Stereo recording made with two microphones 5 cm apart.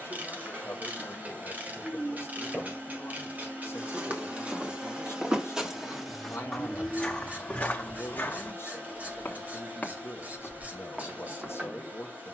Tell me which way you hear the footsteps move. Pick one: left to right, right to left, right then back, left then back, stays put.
left then back.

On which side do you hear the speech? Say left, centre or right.
left.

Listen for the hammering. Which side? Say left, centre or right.
right.